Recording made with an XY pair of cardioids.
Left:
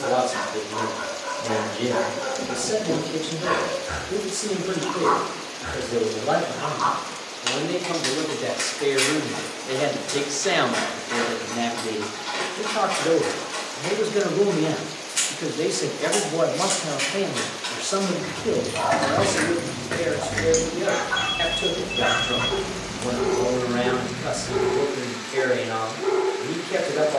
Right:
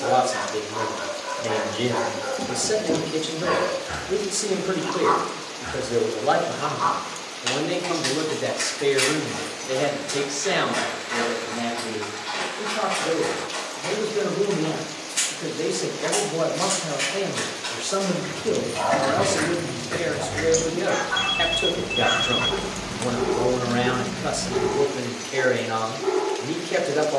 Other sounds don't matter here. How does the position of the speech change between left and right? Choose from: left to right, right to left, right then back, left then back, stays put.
left then back.